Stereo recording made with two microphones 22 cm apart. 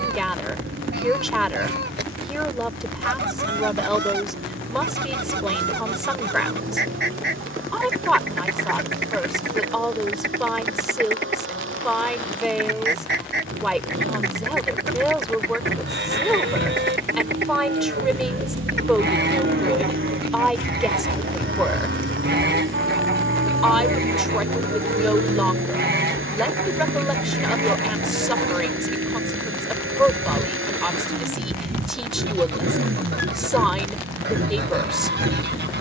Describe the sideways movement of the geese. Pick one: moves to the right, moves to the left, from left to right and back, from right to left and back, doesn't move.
doesn't move.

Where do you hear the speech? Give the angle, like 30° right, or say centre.
centre.